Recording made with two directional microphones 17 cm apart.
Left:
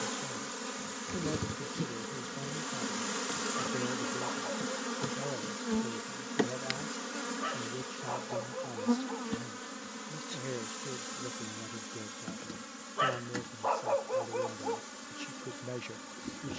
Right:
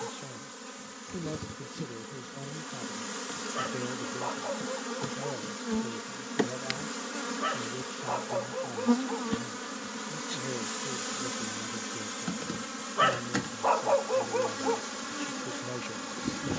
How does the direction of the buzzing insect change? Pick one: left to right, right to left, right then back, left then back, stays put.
left to right.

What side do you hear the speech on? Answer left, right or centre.
centre.